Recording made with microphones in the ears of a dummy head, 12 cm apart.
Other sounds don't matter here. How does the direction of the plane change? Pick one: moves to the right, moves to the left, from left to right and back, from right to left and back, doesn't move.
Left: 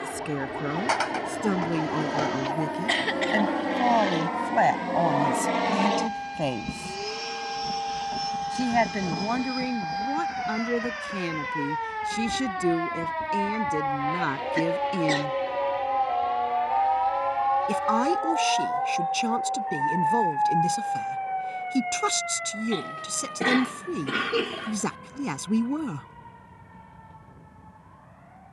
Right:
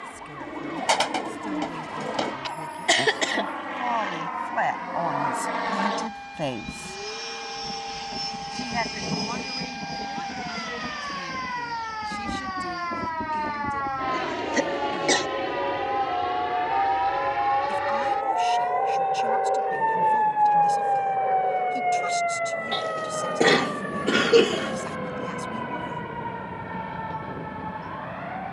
moves to the right.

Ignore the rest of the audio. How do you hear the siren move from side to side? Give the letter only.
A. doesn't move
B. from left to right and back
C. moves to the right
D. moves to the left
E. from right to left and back
C.